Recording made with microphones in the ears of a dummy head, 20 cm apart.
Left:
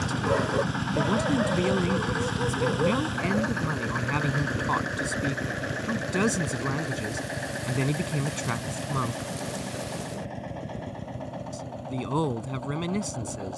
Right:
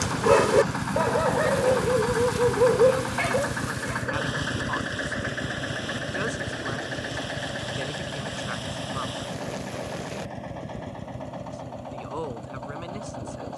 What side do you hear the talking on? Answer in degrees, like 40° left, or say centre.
60° left.